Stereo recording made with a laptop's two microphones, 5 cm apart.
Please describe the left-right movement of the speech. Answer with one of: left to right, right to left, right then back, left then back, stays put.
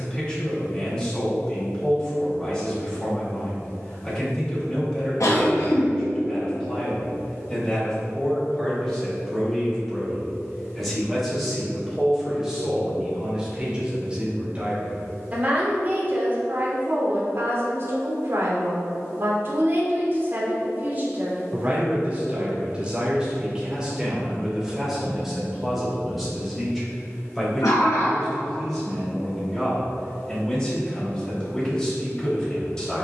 right then back.